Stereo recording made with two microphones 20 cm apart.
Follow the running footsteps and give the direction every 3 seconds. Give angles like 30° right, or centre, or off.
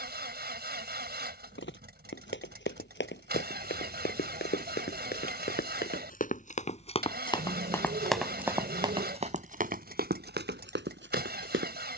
60° left, 50° left, 10° left, 50° right.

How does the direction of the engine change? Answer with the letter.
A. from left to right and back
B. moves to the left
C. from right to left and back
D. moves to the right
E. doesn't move
E.